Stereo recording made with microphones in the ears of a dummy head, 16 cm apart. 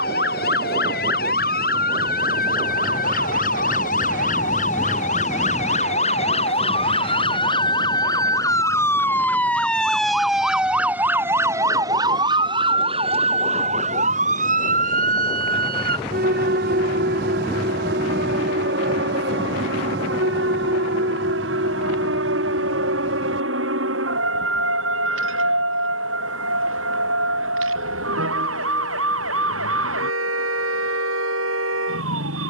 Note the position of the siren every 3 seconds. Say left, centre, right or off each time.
left, left, left, centre, right, right, right, right, right, right, right.